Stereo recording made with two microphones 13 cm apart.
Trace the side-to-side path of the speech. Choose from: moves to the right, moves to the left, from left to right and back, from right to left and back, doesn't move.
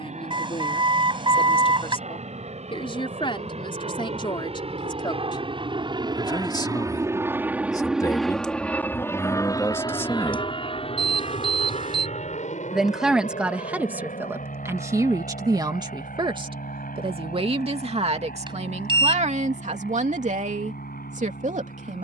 moves to the right.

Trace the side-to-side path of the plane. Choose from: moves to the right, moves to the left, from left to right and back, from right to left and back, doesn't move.
moves to the left.